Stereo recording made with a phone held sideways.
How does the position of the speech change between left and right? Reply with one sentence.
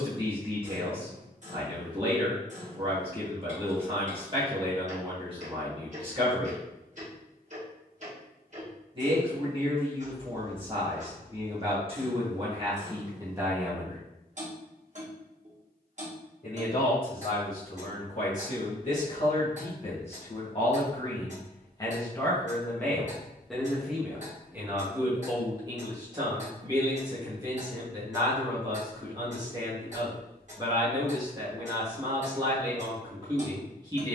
You can hear the speech move from right to left and back again.